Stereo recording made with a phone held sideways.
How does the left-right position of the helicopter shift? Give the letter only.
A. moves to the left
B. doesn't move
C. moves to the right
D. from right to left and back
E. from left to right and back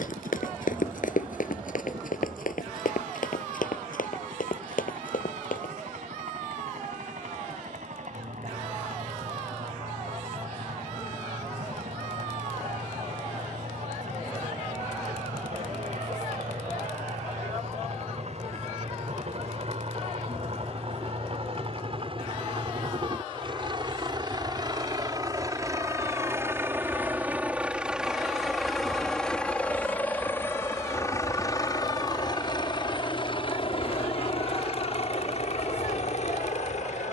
A.